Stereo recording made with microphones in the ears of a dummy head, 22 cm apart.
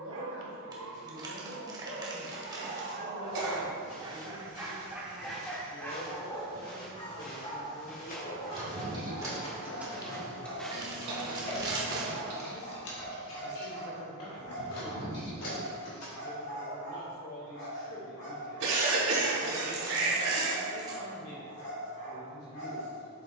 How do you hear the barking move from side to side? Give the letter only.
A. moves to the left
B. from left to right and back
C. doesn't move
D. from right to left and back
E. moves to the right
A.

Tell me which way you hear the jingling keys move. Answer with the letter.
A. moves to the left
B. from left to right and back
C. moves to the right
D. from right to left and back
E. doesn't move
A.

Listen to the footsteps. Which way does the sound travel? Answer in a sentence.
In this clip you hear the footsteps go from the left side to the right.